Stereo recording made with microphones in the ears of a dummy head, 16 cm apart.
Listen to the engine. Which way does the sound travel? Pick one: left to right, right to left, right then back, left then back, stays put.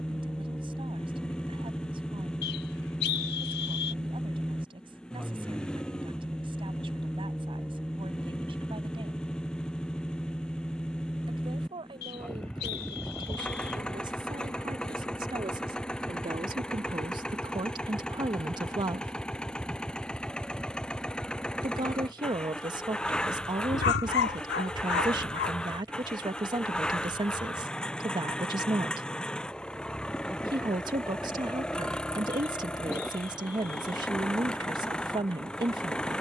stays put.